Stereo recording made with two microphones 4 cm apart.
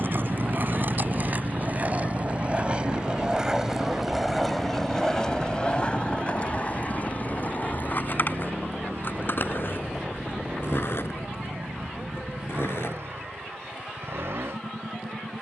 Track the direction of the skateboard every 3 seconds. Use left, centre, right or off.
right, centre, left, left, left.